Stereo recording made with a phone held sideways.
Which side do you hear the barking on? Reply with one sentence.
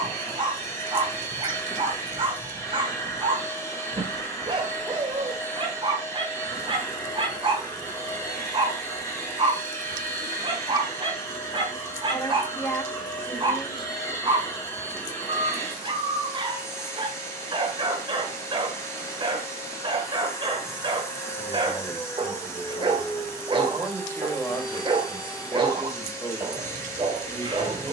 In this clip you hear the barking on the right.